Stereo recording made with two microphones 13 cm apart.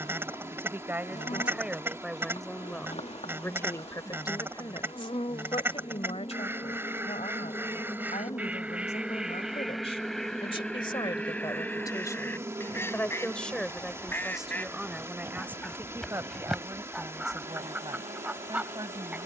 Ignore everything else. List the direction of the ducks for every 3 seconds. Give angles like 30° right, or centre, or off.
20° right, 20° right, 10° right, 10° left, 20° left, centre, 10° right.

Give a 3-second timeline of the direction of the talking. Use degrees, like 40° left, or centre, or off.
centre, 30° left, 60° left, 40° left, 10° left, 20° right, 30° right.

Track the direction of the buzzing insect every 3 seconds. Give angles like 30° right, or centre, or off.
60° left, 50° left, 30° left, centre, 30° right, 50° right, 60° right.